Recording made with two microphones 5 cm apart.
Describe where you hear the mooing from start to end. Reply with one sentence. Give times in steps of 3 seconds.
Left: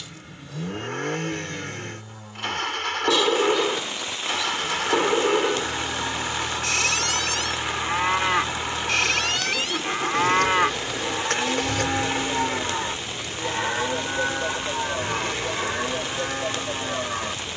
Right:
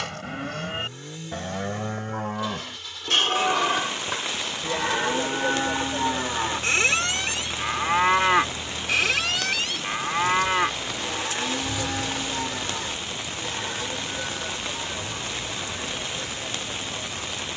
In this clip you hear the mooing on the right from 0 s, in the centre from 9 s and on the left from 12 s.